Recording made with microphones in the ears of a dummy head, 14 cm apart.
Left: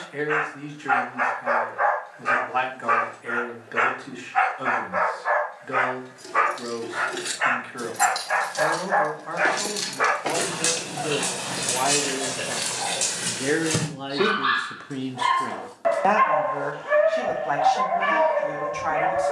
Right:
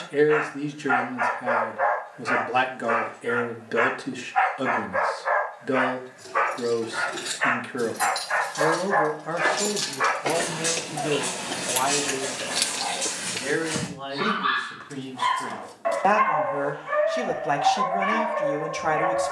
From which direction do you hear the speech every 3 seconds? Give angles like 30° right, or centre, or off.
40° right, 40° right, 40° right, 20° right, 30° left, 10° right, 40° right.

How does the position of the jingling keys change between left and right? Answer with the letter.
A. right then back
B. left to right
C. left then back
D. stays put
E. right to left
B.